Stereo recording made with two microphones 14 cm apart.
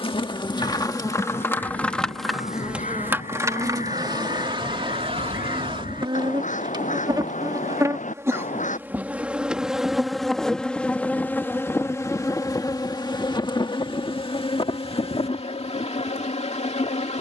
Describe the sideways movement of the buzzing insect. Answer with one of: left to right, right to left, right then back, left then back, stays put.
right then back.